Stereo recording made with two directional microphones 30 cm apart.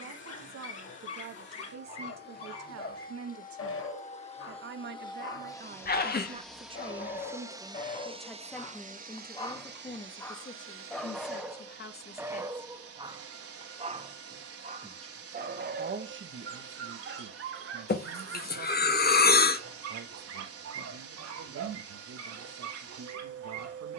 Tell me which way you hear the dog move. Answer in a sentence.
In this clip you hear the dog move to the right.